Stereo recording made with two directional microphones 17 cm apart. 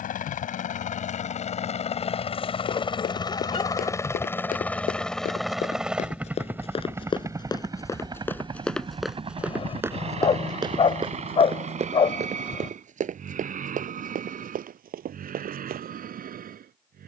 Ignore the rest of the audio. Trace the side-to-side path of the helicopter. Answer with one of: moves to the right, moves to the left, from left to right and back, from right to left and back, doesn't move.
moves to the right.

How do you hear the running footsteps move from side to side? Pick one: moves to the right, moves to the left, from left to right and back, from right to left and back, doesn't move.
moves to the right.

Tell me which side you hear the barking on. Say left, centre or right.
left.